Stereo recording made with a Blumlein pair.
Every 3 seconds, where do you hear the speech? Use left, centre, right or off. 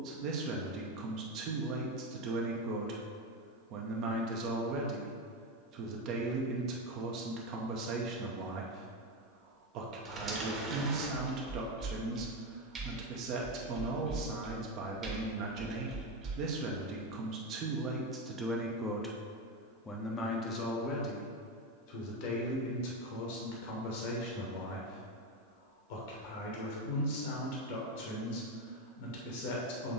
right, right, right, right, right, right, centre, left, left, left.